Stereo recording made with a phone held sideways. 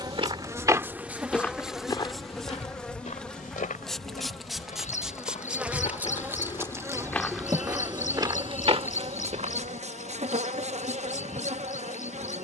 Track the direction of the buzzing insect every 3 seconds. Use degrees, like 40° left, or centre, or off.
10° right, centre, 20° right, 50° right.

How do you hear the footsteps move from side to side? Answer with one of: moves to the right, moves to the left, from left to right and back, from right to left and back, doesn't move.
from right to left and back.